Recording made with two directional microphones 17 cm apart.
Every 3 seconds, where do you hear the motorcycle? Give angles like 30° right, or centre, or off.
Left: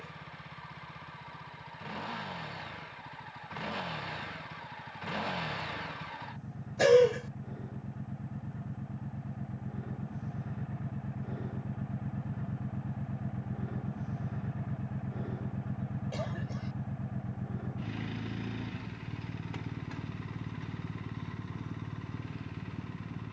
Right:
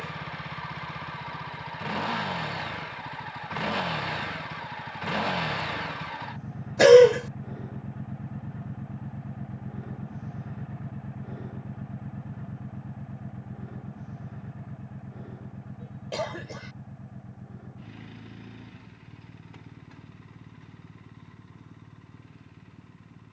60° right, 50° right, 30° right, 10° right, 10° left, 30° left, 40° left, 50° left.